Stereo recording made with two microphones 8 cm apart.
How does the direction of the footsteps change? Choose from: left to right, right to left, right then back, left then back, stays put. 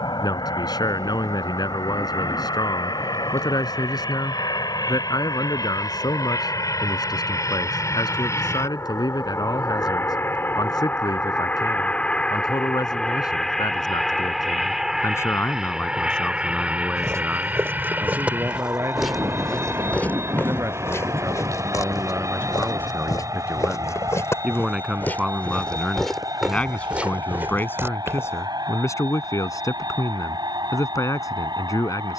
left then back.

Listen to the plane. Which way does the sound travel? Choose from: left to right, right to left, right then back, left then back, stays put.
left to right.